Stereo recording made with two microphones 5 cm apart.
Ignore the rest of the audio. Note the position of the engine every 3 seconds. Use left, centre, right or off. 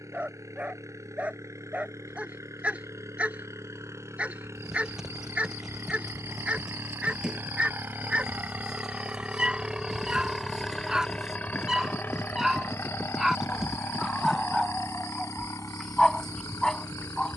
right, right, right, centre, left, left.